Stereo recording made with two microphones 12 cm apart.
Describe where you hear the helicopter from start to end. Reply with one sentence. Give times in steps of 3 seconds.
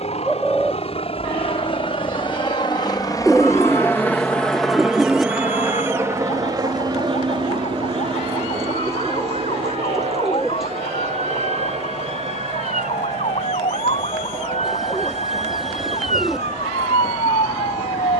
You can hear the helicopter on the left from 0 s, in the centre from 3 s and on the right from 6 s.